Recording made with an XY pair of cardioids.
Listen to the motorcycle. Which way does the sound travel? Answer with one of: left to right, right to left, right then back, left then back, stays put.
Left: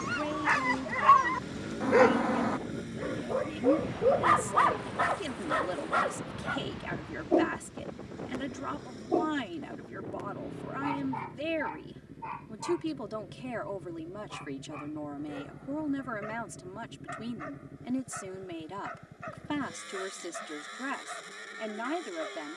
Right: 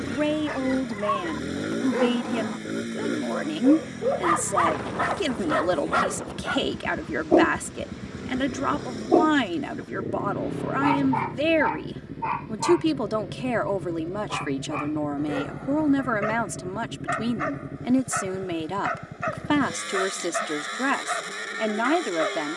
stays put.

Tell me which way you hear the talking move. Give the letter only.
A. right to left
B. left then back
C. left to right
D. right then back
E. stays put
E.